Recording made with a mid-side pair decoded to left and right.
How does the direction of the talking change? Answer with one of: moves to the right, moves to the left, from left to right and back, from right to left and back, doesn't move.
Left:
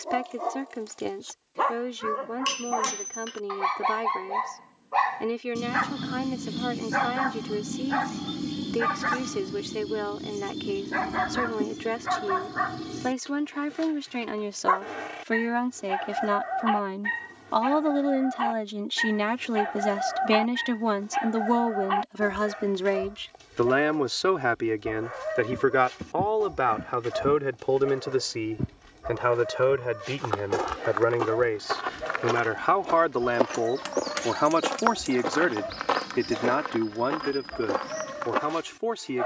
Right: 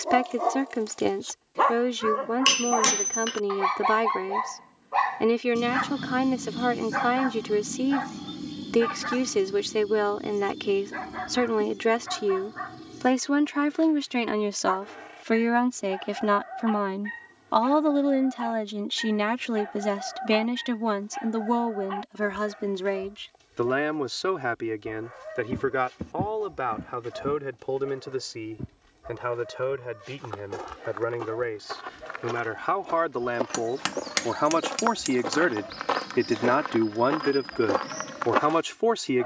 from right to left and back.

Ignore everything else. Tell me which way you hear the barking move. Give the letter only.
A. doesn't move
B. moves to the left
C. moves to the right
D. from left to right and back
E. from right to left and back
B.